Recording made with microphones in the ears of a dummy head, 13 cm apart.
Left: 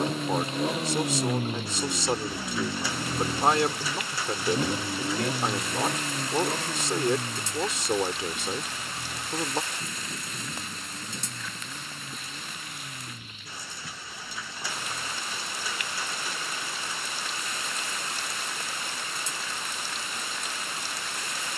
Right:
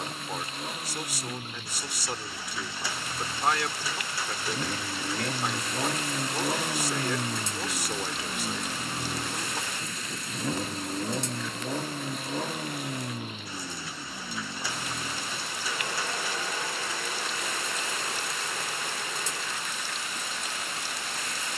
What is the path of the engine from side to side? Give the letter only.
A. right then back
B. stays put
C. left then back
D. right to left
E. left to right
E.